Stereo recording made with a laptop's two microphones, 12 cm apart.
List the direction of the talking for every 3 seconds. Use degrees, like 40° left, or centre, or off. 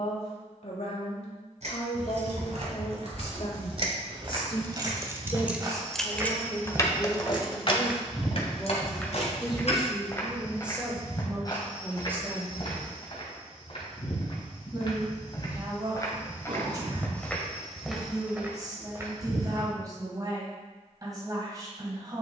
60° left, 40° left, 20° left, 10° right, 20° right, 30° right, 30° right, 30° right.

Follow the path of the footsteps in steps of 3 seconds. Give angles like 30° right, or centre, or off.
off, 40° right, 10° right, 30° left, 40° left, 20° left, 20° right, off.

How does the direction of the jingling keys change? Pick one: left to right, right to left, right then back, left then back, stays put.
right to left.